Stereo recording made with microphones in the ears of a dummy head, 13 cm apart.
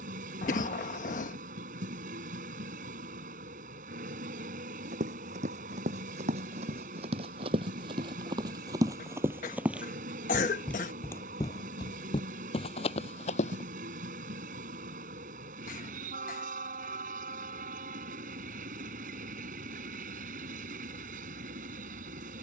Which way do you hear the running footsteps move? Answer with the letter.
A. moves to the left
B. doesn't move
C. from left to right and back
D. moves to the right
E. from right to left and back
A.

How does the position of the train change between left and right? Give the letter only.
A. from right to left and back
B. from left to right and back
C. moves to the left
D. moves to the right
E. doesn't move
E.